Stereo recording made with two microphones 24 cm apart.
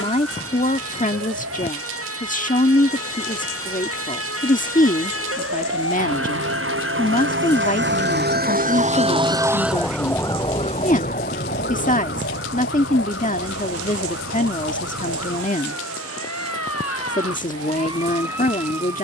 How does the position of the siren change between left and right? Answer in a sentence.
In this clip you hear the siren travel towards the left.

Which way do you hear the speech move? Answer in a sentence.
You can hear the speech stay put.